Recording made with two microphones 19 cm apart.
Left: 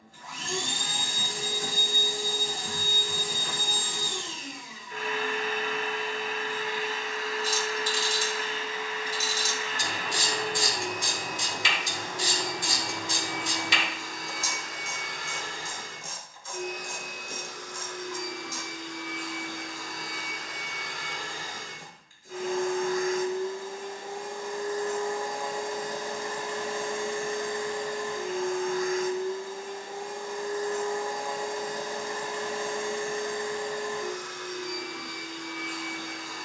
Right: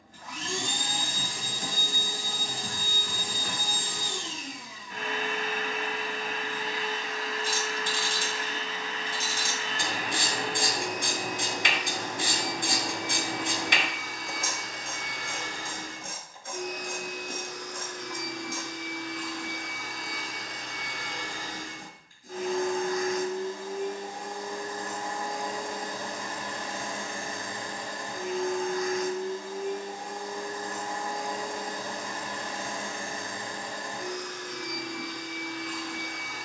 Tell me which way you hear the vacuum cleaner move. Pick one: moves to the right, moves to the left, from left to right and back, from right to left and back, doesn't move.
doesn't move.